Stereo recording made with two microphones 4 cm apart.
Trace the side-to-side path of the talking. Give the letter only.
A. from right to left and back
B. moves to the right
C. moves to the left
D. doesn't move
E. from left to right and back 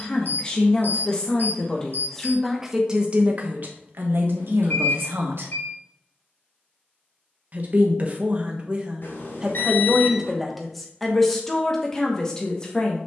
E.